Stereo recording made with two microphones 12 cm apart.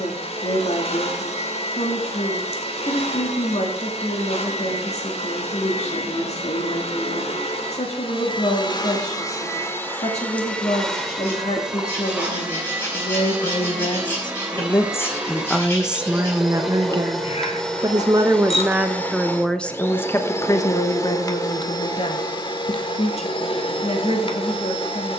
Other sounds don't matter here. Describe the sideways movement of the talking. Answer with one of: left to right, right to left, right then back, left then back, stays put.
right then back.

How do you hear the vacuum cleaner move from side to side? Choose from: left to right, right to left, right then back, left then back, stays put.
right then back.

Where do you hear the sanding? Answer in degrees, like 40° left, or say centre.
20° left.